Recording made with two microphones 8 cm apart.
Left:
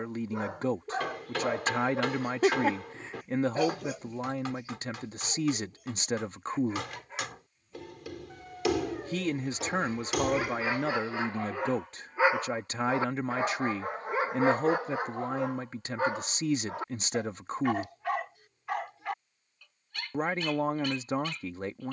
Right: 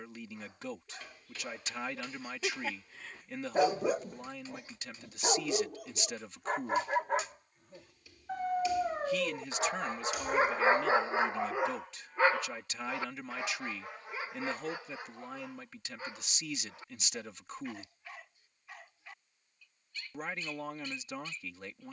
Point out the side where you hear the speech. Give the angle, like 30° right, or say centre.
40° left.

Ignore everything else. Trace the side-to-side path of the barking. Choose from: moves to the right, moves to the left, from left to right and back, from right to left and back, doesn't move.
from left to right and back.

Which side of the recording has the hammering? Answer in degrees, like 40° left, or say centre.
80° left.